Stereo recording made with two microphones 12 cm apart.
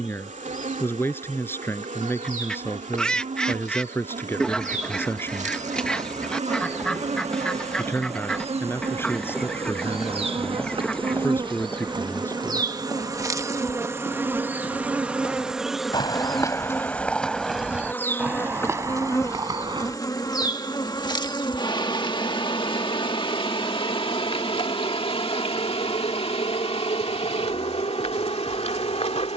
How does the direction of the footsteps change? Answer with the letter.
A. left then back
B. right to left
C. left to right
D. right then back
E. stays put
A.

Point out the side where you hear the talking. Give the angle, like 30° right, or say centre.
20° left.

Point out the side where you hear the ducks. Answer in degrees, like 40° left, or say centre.
10° left.